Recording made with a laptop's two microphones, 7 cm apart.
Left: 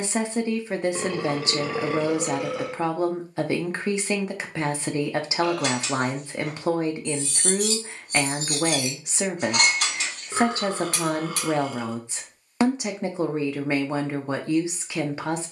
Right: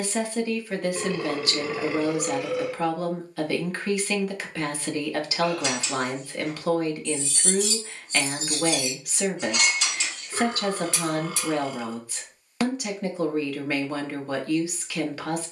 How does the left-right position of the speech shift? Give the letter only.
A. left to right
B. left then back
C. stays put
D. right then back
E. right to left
C.